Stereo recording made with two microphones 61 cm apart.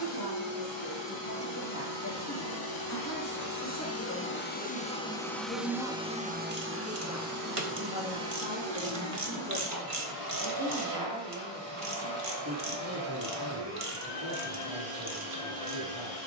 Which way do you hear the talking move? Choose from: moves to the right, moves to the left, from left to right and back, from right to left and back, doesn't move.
moves to the right.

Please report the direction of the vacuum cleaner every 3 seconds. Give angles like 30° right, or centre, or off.
50° left, 20° left, 30° right, 60° right, 80° right, 80° right.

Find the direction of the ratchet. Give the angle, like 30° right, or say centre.
60° right.